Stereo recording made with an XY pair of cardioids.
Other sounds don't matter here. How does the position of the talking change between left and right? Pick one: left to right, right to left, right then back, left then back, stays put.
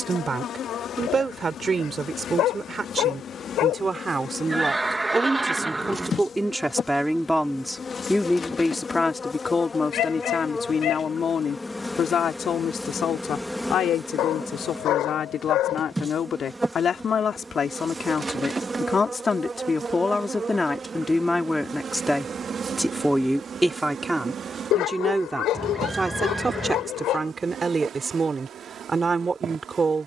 left then back.